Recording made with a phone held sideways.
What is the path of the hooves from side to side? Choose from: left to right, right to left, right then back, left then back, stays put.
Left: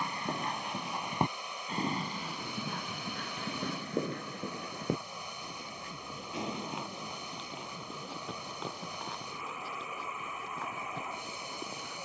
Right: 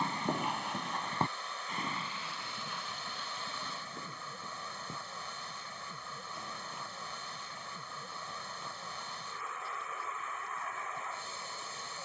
right to left.